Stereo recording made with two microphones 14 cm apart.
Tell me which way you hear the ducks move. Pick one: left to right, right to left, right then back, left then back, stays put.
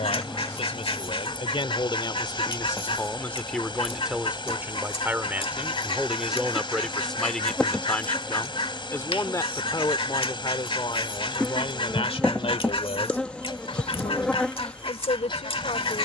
stays put.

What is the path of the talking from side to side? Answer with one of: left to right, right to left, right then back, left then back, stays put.
right then back.